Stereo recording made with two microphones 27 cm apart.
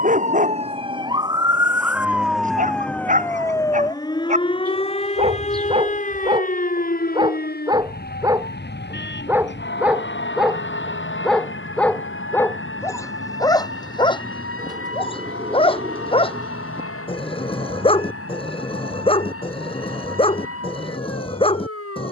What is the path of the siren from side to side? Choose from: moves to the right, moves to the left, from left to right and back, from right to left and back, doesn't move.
moves to the left.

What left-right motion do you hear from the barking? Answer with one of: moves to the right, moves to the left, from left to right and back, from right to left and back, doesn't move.
moves to the left.